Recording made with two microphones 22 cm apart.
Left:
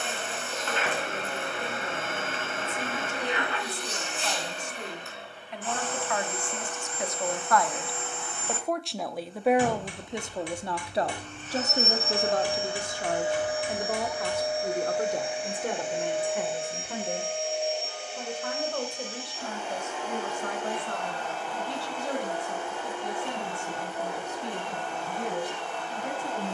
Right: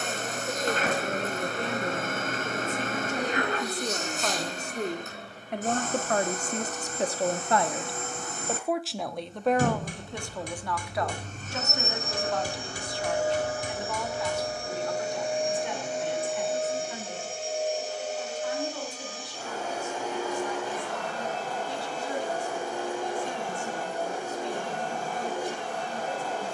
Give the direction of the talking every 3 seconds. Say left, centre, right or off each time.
right, right, right, left, left, left, left, left, left.